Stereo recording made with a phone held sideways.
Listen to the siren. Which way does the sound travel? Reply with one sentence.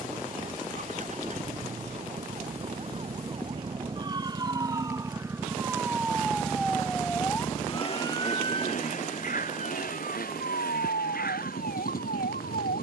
You can hear the siren move from right to left.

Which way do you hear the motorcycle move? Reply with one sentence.
You can hear the motorcycle move to the left.